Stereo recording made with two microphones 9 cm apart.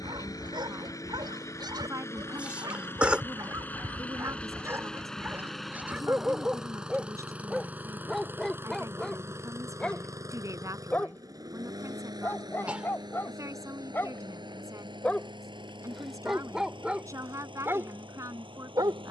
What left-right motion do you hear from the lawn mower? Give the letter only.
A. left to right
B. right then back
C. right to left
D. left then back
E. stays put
A.